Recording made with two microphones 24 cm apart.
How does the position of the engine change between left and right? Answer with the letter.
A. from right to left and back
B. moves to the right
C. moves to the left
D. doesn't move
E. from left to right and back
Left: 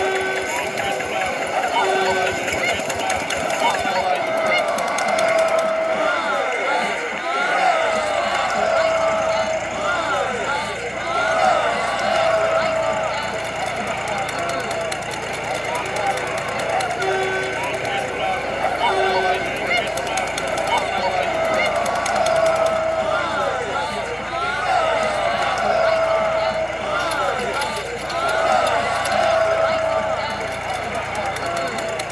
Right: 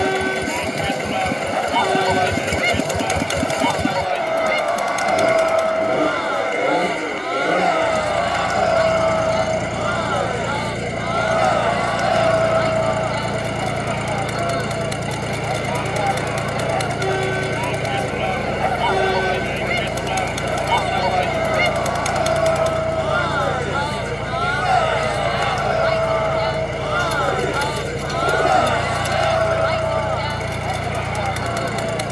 D.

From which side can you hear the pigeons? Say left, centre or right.
right.